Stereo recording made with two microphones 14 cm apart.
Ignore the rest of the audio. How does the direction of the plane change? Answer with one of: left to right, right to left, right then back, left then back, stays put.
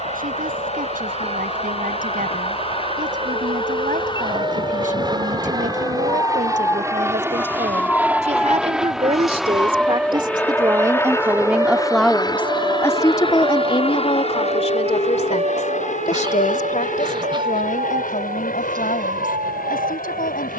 right to left.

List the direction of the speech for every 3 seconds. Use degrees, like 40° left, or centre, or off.
80° right, 70° right, 60° right, 30° right, 30° left, 60° left, 70° left.